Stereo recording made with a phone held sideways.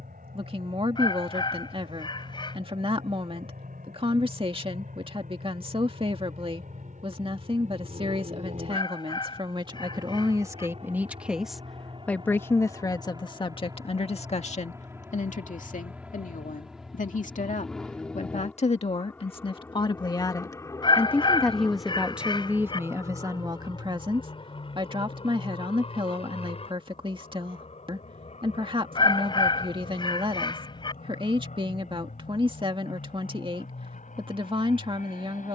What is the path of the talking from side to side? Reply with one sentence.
In this clip you hear the talking go left and come back.